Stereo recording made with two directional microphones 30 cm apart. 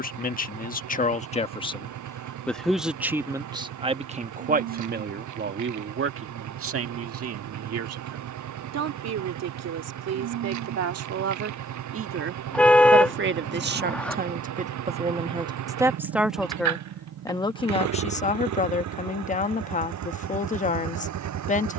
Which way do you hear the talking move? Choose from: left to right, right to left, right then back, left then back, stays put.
right then back.